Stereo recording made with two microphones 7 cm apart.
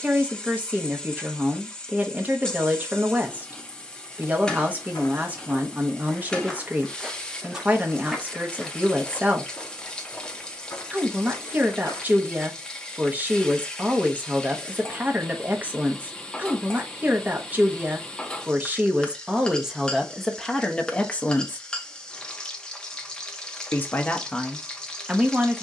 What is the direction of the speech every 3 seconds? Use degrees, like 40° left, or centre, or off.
20° right, 20° right, 20° right, 20° right, 20° right, 20° right, 10° right, 20° left, centre.